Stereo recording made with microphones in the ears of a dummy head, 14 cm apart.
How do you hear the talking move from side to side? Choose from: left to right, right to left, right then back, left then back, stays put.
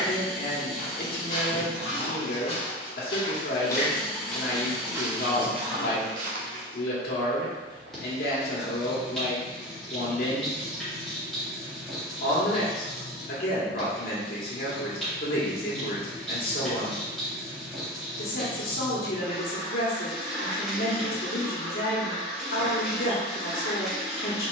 stays put.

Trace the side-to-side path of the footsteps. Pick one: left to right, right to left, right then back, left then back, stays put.
left to right.